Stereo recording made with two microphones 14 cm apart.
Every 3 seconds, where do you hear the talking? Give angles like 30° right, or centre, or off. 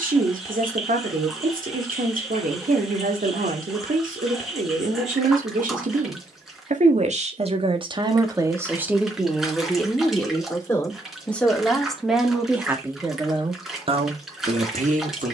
80° right, 80° right, 40° right, 10° left, 30° right.